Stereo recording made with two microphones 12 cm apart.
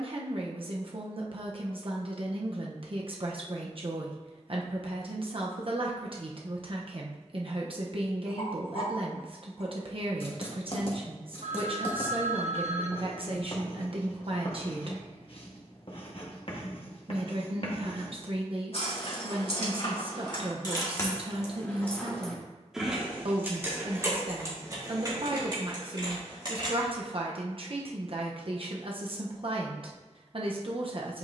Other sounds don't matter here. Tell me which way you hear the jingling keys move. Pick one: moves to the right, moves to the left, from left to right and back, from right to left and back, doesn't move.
moves to the right.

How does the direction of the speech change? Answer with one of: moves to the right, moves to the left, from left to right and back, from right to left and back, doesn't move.
doesn't move.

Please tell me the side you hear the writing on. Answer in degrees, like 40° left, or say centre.
50° left.